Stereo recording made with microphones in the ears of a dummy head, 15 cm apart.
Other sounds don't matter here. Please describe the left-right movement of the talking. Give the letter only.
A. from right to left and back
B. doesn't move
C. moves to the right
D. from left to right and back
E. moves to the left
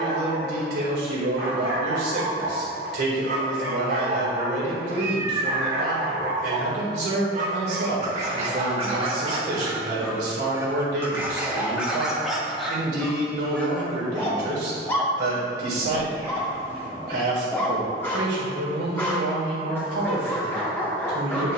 B.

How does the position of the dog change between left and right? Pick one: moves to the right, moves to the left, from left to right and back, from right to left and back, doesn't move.
moves to the left.